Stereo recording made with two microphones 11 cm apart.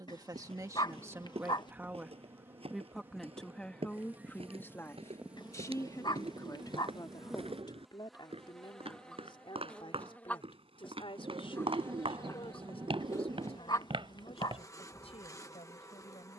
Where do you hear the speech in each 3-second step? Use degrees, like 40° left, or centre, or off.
20° right, 20° left, 40° left, 50° left, 60° left, 60° left.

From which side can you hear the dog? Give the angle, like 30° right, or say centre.
40° left.